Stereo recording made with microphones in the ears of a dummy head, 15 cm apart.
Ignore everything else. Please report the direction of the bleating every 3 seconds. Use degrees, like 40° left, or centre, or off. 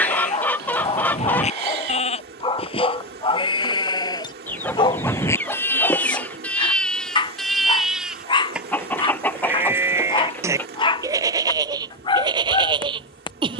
40° left, 20° left, centre, 20° right, 30° right.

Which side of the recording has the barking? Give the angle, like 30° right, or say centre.
30° left.